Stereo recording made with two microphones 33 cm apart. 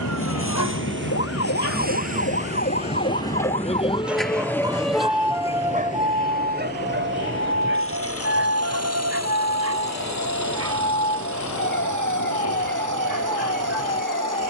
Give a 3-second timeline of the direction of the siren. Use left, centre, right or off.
left, centre, right, right, right.